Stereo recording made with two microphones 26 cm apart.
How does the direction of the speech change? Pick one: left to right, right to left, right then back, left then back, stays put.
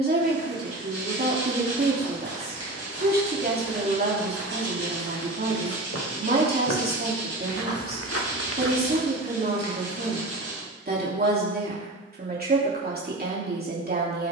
stays put.